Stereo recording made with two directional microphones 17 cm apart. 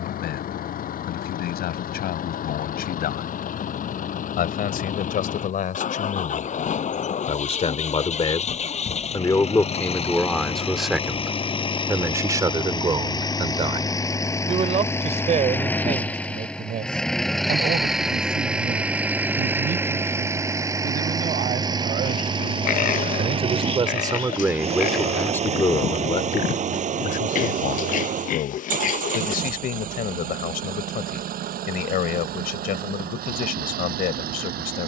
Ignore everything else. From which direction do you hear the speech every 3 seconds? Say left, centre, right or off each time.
left, left, left, centre, right, right, right, right, centre, left, left, left.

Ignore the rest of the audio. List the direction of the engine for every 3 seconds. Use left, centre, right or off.
left, left, left, left, left, centre, centre, right, right, right, right, right.